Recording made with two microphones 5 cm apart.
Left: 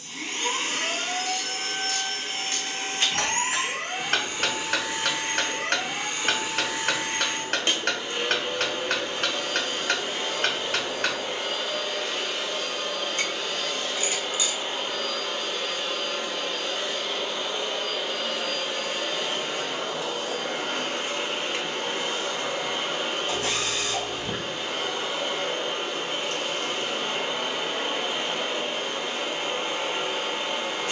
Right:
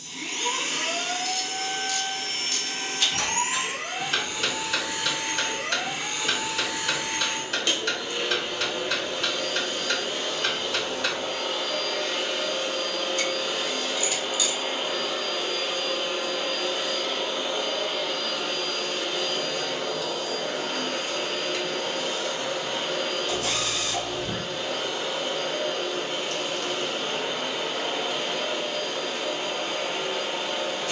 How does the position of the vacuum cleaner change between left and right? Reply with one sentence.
In this clip you hear the vacuum cleaner go right and come back.